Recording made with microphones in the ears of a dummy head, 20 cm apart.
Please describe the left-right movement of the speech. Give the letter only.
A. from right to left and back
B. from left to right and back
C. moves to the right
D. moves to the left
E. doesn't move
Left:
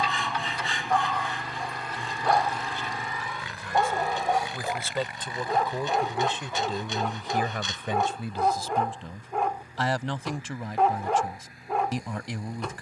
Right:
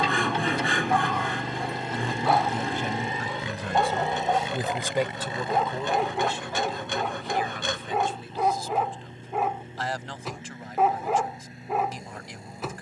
D.